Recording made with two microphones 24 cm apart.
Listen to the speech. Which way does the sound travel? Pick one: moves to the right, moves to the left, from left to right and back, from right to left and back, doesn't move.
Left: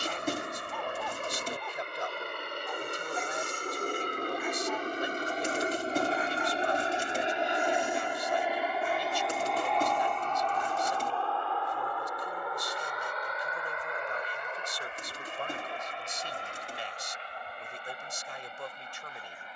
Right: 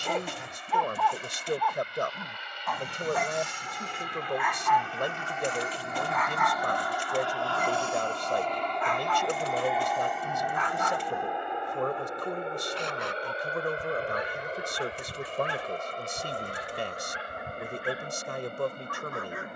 doesn't move.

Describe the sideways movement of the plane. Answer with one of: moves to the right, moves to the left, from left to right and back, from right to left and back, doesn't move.
moves to the right.